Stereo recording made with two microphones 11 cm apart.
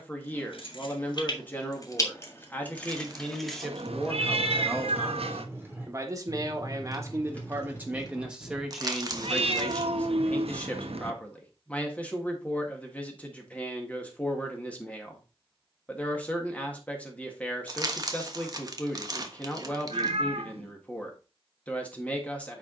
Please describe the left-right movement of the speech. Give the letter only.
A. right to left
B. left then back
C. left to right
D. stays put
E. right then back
E.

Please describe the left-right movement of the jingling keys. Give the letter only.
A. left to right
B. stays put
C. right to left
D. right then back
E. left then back
D.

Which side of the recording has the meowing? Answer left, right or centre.
right.